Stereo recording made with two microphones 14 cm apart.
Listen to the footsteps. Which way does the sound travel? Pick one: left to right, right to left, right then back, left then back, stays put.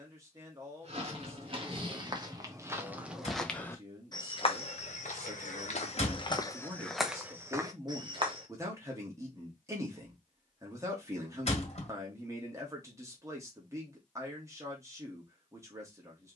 left then back.